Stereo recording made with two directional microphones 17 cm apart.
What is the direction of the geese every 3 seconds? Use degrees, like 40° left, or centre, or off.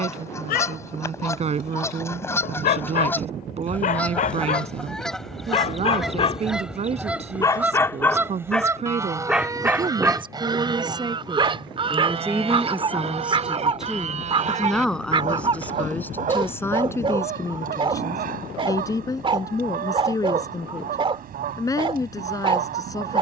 20° left, 10° left, 10° right, 20° right, 40° right, 50° right, 60° right, 60° right.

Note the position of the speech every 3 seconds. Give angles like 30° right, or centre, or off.
40° right, 40° right, 40° right, 30° right, 10° right, 10° left, 20° left, 20° left.